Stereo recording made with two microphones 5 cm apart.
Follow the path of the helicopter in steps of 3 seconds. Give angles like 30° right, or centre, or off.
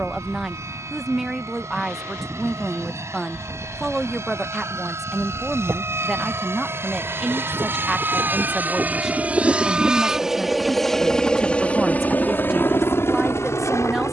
60° right, 60° right, 40° right, centre, 50° left.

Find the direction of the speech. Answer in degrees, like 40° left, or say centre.
10° right.